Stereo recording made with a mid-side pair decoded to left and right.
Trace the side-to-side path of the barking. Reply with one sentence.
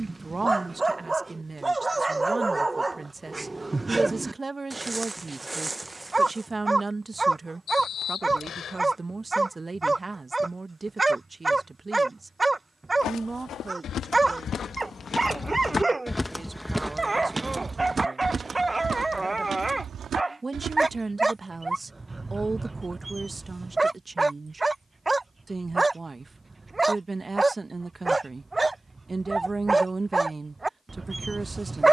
In this clip you hear the barking stay put.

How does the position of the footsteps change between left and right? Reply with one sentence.
You can hear the footsteps move to the right.